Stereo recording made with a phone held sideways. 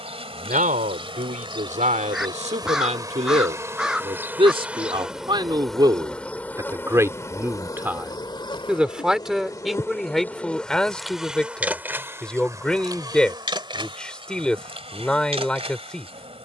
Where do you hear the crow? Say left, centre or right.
centre.